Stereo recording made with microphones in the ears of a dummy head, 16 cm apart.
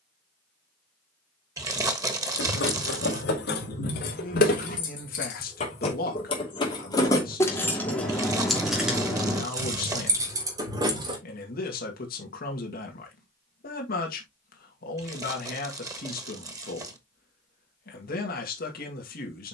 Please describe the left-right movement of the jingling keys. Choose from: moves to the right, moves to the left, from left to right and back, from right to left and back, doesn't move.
moves to the right.